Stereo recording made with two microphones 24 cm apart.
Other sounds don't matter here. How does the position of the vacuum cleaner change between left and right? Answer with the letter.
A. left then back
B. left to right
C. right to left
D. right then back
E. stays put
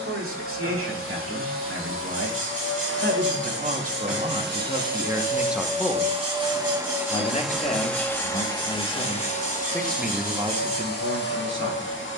C.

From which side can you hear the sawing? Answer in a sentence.
In this clip you hear the sawing on the right.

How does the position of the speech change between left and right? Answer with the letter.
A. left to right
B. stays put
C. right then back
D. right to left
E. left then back
E.